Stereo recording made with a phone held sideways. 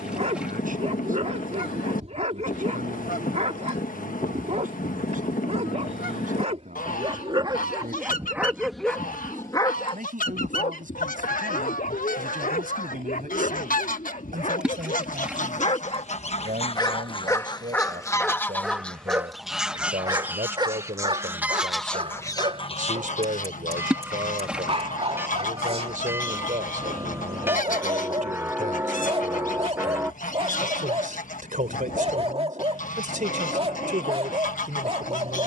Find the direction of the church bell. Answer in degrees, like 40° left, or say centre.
10° right.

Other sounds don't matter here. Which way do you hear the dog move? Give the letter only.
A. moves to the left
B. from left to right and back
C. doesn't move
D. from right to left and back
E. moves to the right
D.